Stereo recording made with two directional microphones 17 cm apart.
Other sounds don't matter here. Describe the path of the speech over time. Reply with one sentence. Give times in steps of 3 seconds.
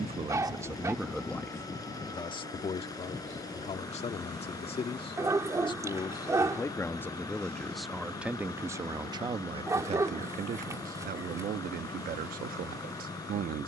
You can hear the speech in the centre from 0 s, on the left from 3 s, in the centre from 6 s and on the right from 9 s.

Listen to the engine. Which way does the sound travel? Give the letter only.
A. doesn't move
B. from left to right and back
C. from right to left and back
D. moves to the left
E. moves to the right
A.